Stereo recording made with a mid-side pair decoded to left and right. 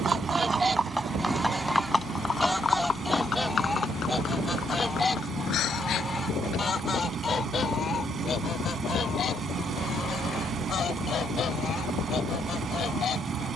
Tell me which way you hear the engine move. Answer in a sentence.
In this clip you hear the engine stay in one place.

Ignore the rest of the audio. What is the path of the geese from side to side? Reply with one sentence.
You can hear the geese go from the right side to the left.